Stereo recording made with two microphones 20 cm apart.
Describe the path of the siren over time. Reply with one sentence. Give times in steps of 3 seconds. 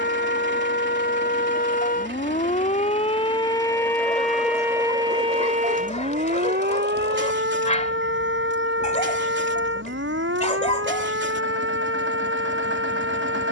You can hear the siren on the left from 0 s, in the centre from 3 s and on the right from 6 s.